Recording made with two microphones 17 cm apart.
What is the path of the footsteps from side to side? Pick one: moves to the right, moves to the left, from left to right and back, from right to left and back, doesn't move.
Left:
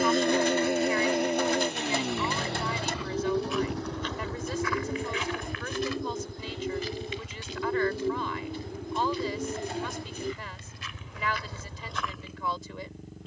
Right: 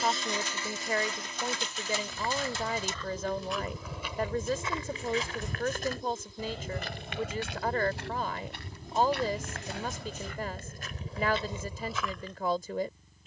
from left to right and back.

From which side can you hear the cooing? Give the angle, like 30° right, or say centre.
60° left.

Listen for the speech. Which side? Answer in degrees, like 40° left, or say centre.
50° right.